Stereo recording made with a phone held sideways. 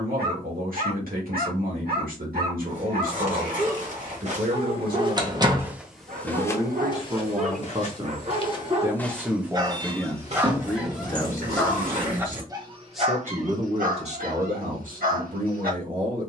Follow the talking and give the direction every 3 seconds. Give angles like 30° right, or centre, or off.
70° right, 70° right, 40° right, 10° left, 30° right, 60° right.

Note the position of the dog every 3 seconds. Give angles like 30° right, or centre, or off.
80° right, 80° right, 60° right, 10° right, 50° right, 70° right.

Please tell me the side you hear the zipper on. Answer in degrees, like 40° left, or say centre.
60° right.